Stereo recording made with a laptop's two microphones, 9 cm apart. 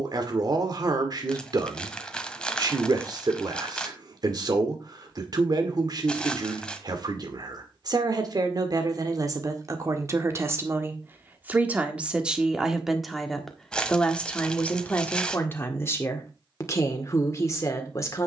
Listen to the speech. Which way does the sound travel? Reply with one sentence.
You can hear the speech travel towards the left.